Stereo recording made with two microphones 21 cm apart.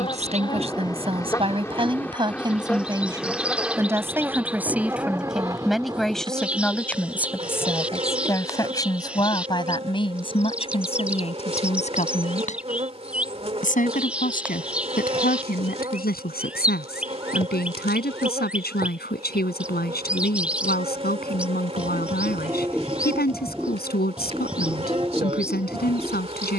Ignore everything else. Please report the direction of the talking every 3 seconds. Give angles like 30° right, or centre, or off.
30° right, 10° right, 10° left, 30° left, 40° left, 50° left, 50° left, 50° left, 50° left.